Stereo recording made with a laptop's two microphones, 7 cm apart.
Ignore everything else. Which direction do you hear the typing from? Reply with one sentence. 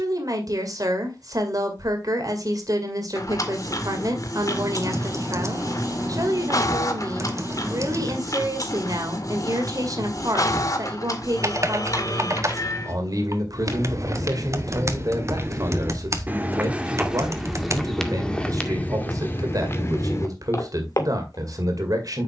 In this clip you hear the typing on the right.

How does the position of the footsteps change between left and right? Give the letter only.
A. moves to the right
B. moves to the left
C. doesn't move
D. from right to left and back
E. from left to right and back
B.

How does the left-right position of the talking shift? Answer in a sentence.
You can hear the talking stay in one place.